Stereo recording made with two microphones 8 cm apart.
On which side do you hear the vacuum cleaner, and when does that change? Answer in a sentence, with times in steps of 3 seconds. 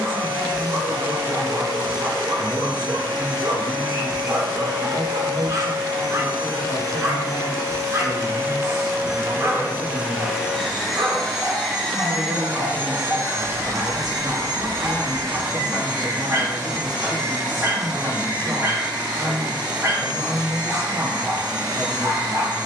You can hear the vacuum cleaner on the right from 0 s, in the centre from 9 s and on the right from 12 s.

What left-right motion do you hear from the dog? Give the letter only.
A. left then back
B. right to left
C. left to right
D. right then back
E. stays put
E.